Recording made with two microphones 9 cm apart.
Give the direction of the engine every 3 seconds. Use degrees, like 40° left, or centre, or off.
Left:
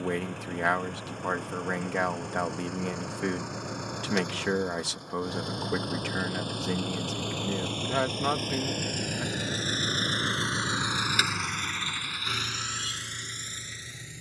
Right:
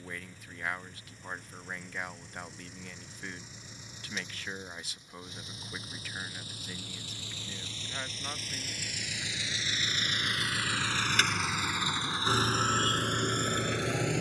70° left, 70° left, 60° left, 20° left, 50° right.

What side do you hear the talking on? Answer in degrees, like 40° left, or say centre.
80° left.